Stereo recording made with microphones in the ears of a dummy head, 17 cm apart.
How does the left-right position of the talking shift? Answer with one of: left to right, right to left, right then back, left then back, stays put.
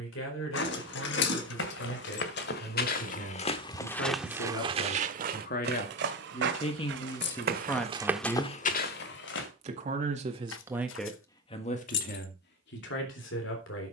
right then back.